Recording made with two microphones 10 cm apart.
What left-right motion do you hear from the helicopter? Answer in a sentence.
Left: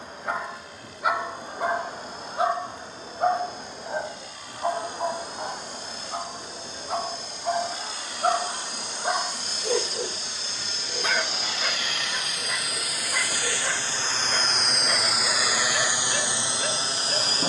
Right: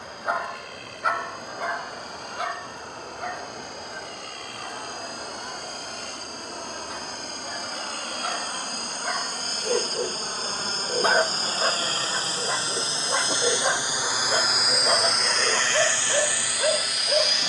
In this clip you hear the helicopter move to the left.